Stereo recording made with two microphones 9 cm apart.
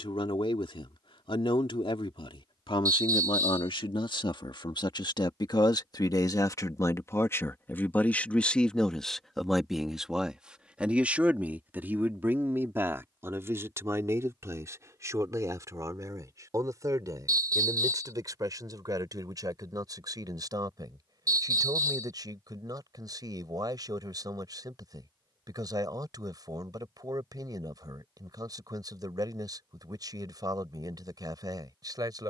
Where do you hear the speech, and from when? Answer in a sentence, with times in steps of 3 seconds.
In this clip you hear the speech on the left from 0 s, in the centre from 9 s and on the right from 12 s.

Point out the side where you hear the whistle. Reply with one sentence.
In this clip you hear the whistle on the right.